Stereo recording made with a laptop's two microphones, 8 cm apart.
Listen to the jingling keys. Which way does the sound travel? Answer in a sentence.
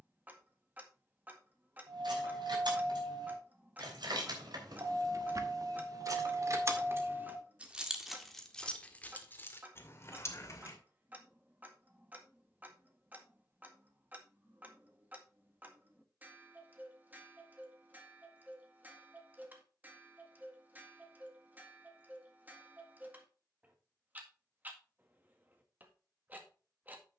In this clip you hear the jingling keys travel towards the left.